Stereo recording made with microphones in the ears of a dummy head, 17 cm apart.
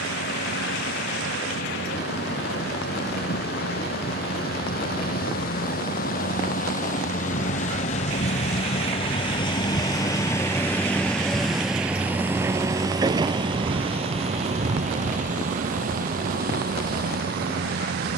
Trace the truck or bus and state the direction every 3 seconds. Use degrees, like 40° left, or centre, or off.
70° left, 60° left, 50° left, 10° left, 30° right, 50° right.